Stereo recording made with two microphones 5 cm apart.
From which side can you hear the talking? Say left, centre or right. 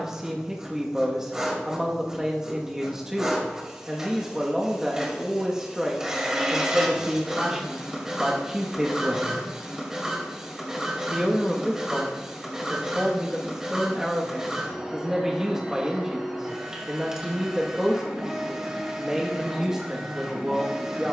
centre.